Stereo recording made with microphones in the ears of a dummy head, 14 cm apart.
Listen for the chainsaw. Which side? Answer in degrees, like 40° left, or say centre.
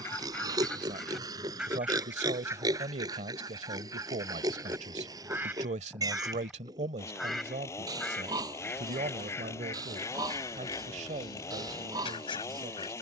20° left.